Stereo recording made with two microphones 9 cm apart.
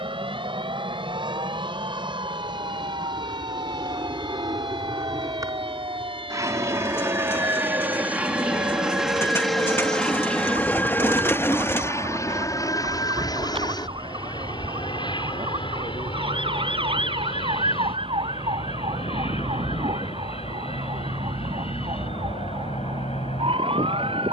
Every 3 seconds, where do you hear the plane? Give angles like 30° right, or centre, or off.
60° right, 50° right, 20° right, 10° left, 40° left, 60° left, 70° left, 70° left.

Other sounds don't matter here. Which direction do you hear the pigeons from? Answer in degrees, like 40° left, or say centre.
20° left.